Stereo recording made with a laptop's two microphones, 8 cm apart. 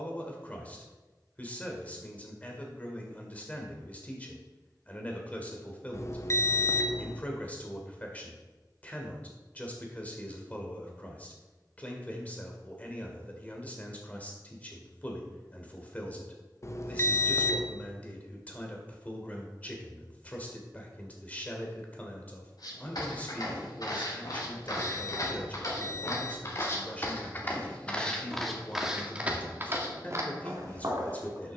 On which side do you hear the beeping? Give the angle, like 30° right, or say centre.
40° left.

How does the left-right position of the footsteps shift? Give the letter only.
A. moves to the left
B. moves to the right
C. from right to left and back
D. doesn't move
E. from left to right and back
B.